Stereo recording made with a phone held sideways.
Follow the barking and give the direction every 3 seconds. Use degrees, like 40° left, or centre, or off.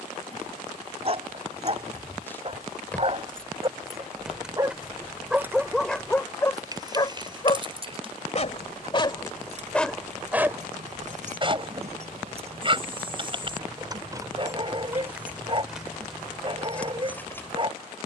40° right, 20° right, 30° left, 10° right, 40° right, 40° right.